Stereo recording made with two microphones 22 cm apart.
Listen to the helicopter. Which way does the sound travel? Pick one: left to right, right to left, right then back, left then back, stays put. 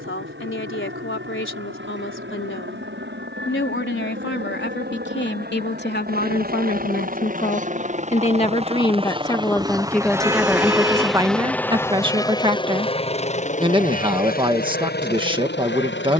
right to left.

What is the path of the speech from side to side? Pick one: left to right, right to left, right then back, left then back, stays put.
left to right.